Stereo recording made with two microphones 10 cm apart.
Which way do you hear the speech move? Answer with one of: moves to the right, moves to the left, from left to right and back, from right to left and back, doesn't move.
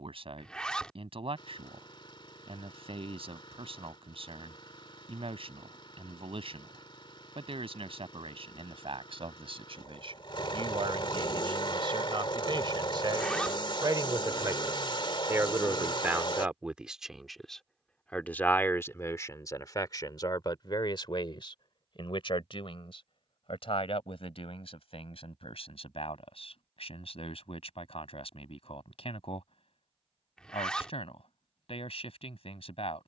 moves to the left.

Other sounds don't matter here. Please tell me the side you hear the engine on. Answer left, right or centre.
left.